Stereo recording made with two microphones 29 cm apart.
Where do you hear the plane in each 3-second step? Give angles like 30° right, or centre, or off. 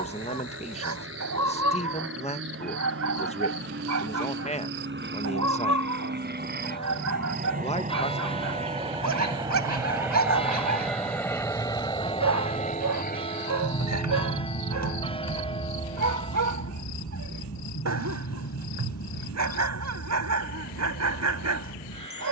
60° right, 50° right, 30° right, centre, 30° left, 60° left, 70° left, 80° left.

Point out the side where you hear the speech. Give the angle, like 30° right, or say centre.
20° left.